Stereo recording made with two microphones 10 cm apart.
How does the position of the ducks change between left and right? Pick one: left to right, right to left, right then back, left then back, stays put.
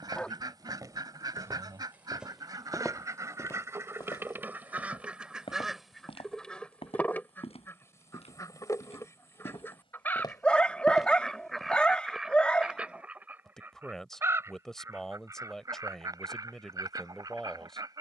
left then back.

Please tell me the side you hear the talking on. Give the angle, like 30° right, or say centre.
centre.